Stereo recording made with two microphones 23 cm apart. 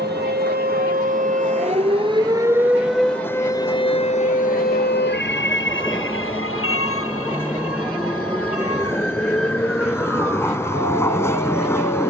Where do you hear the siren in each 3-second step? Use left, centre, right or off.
right, left, left, left.